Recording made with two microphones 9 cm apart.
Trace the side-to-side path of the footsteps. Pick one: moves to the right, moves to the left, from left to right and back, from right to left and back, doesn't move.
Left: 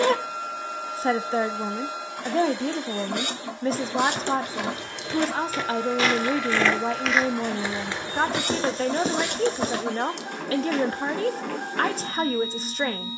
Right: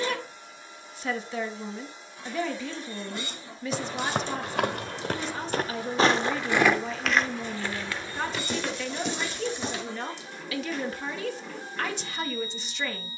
moves to the left.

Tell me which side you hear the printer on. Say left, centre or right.
left.